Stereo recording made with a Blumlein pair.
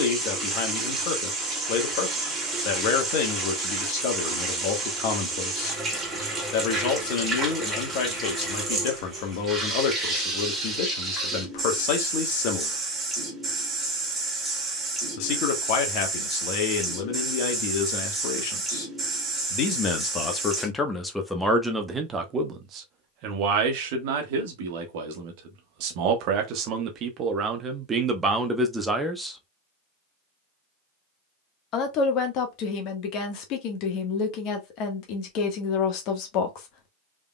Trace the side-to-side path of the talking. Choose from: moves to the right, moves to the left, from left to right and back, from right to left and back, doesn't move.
from left to right and back.